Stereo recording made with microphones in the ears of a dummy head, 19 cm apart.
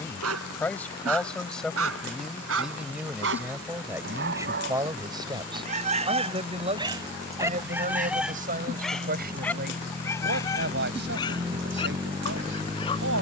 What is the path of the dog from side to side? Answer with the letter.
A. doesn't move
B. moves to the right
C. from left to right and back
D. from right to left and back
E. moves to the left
E.